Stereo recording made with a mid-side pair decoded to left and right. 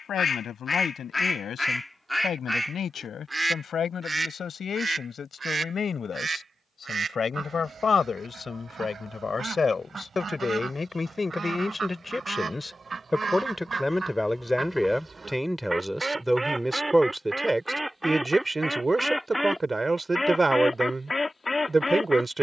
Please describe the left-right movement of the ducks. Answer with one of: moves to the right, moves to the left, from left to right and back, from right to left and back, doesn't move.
from left to right and back.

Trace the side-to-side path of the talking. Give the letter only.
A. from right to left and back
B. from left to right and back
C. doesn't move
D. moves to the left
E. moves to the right
E.